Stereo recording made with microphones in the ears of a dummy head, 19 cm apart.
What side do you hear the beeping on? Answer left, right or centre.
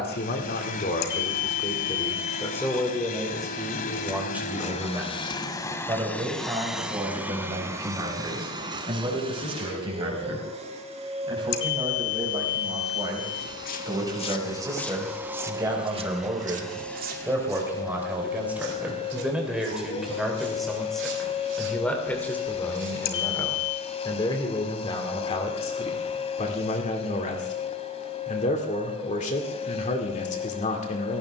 left.